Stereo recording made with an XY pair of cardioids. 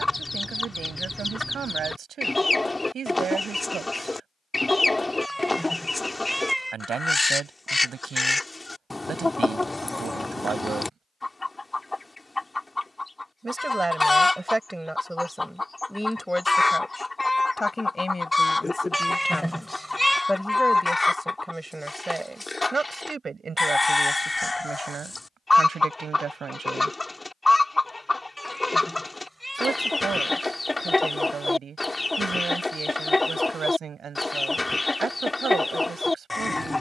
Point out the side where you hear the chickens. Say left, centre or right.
centre.